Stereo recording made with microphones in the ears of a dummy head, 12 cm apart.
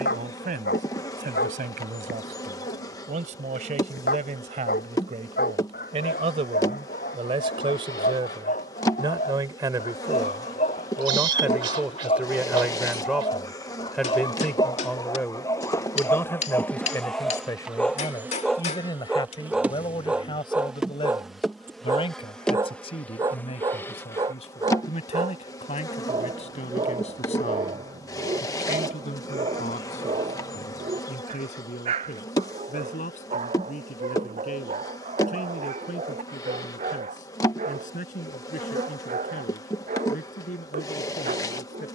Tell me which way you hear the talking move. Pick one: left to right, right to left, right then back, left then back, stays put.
right to left.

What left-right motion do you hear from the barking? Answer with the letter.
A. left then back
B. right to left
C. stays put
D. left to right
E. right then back
D.